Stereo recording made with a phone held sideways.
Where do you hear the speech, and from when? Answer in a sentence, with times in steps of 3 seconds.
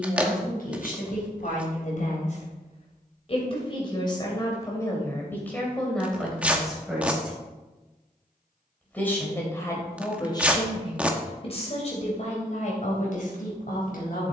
In this clip you hear the speech on the left from 0 s, in the centre from 6 s and on the left from 9 s.